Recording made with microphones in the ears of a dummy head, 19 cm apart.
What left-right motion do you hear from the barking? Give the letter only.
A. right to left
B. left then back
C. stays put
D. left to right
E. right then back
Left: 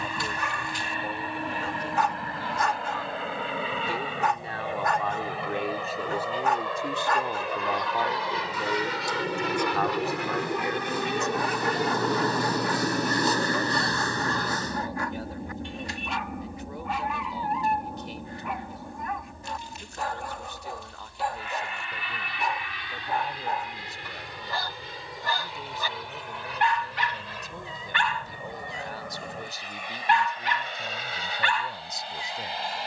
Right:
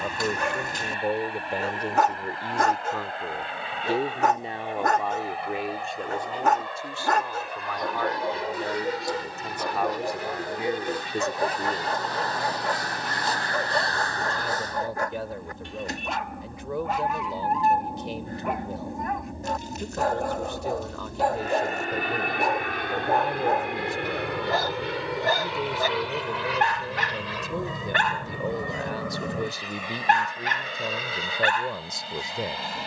C.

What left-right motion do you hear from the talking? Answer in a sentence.
You can hear the talking go left and come back.